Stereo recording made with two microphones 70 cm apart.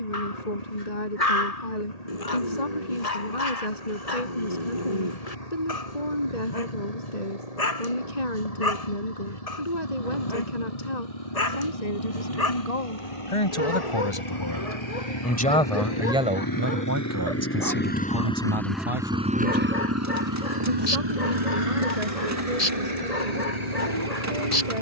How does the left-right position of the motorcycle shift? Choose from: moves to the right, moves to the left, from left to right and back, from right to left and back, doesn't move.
moves to the right.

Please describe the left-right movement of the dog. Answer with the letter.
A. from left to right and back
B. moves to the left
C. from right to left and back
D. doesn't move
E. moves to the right
D.